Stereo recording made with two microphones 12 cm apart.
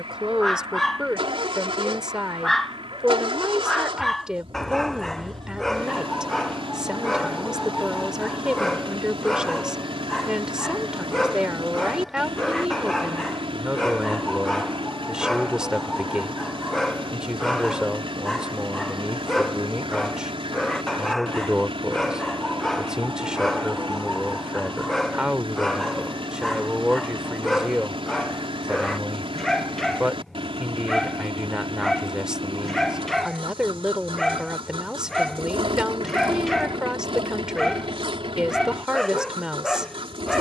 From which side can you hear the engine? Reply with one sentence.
In this clip you hear the engine on the right.